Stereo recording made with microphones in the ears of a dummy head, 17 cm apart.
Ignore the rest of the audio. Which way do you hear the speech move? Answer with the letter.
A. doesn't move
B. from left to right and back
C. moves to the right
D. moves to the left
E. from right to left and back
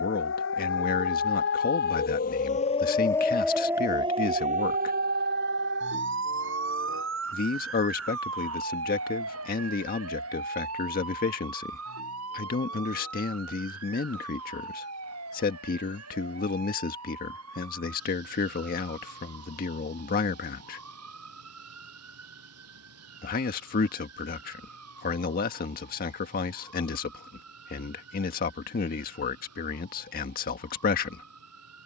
A.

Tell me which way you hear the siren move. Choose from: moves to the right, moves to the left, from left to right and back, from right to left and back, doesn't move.
moves to the right.